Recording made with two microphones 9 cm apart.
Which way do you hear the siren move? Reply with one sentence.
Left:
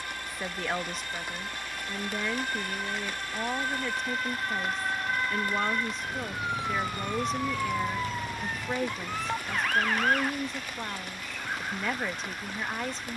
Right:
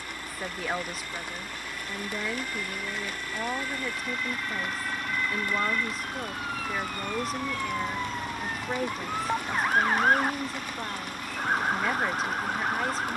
You can hear the siren go from the left side to the right.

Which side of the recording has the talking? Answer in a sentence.
You can hear the talking in the centre.